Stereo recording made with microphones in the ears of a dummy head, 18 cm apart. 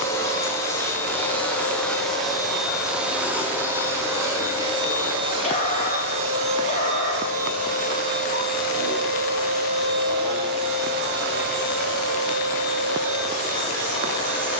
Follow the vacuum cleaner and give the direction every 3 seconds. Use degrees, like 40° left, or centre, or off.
10° left, 20° right, 40° right, 50° right, 60° right.